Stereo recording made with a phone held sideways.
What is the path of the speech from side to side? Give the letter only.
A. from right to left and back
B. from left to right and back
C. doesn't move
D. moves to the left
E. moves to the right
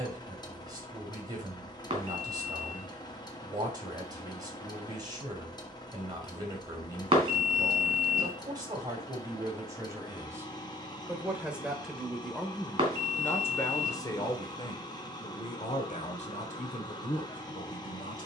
D.